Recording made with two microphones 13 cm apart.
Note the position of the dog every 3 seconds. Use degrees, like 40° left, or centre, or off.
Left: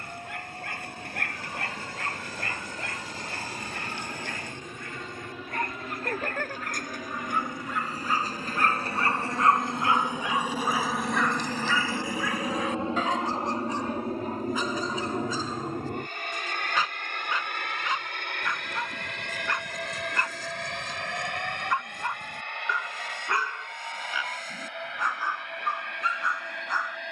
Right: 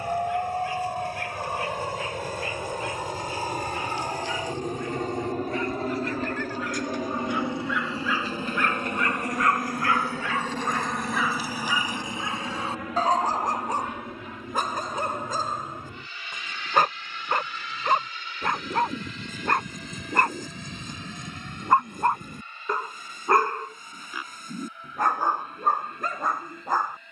60° left, 60° left, 50° left, 10° left, 40° right, 60° right, 60° right, 60° right, 60° right.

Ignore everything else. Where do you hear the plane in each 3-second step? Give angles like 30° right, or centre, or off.
60° right, 50° right, 30° right, centre, 30° left, 50° left, 60° left, 70° left, 70° left.